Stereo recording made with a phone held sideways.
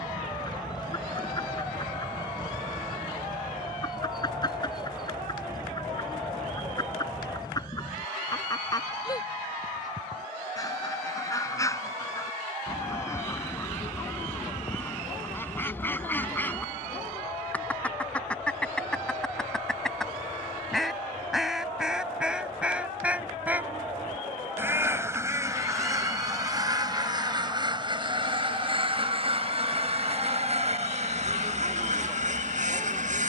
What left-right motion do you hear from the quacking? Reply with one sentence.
In this clip you hear the quacking travel towards the right.